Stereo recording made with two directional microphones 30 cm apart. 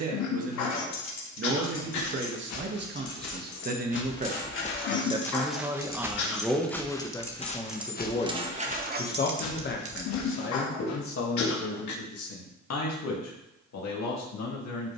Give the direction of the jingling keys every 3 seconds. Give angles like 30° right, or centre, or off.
60° left, 40° left, 10° right, 40° right, off.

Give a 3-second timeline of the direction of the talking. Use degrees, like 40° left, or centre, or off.
40° right, 20° right, 10° left, 40° left, 60° left.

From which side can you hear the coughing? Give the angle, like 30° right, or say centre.
70° left.